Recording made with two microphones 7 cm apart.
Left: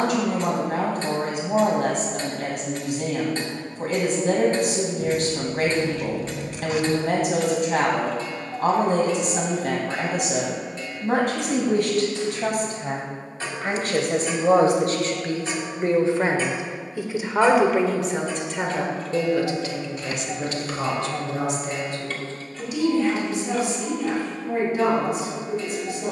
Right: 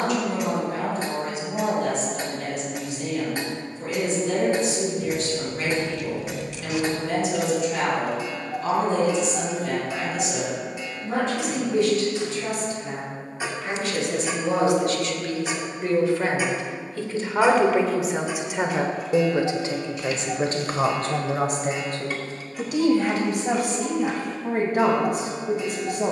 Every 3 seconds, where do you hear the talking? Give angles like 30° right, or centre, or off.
70° left, 70° left, 70° left, 70° left, 60° left, 20° left, 30° right, 50° right, 60° right.